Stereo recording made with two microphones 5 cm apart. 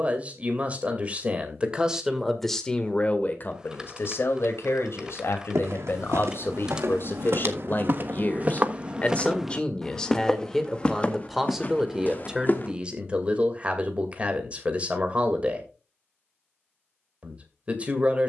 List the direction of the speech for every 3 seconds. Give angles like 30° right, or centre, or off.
10° right, 60° left, 50° left, 10° left, 20° right, 30° right.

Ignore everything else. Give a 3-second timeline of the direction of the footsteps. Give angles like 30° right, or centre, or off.
off, 80° right, 50° right, 20° left, 40° left, off.